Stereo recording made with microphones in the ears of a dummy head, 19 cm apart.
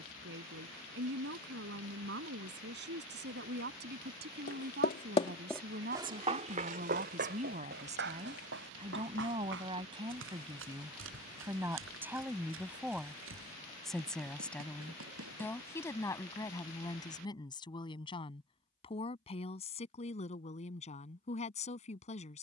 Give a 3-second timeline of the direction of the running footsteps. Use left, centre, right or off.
off, left, right, right, right, right, off, off.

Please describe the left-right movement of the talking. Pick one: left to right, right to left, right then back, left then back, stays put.
right to left.